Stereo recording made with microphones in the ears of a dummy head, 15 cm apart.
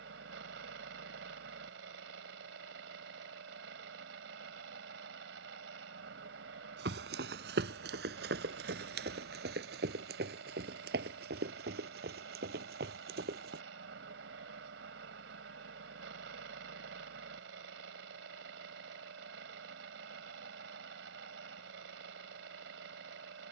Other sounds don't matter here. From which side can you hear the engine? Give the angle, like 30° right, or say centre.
80° right.